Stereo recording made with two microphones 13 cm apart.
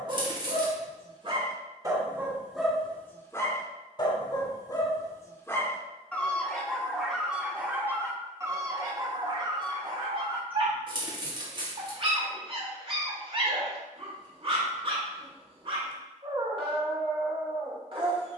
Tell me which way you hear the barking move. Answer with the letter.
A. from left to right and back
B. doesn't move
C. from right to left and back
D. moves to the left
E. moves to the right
C.